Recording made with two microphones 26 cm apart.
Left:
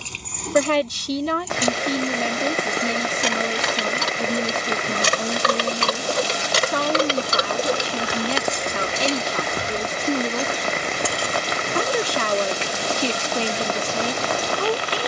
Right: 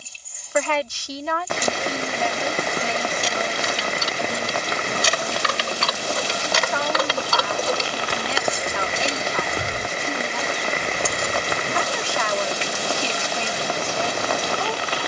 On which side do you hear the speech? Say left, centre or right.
left.